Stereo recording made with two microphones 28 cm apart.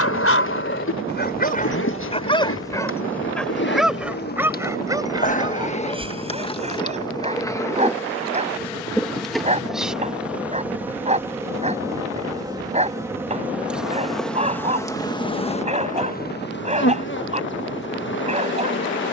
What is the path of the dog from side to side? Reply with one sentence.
You can hear the dog go from the left side to the right.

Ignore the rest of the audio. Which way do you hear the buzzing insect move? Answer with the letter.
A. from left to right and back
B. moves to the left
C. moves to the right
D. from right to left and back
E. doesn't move
A.